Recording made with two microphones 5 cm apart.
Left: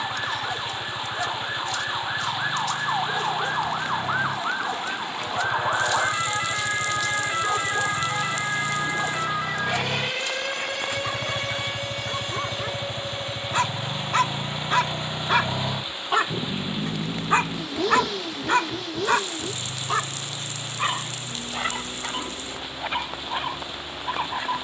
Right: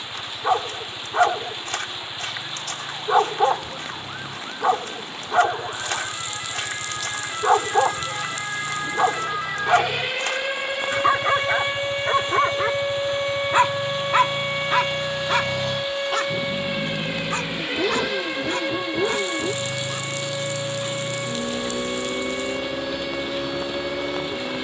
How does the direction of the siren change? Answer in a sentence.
In this clip you hear the siren go from the left side to the right.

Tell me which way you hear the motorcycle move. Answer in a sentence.
You can hear the motorcycle move to the right.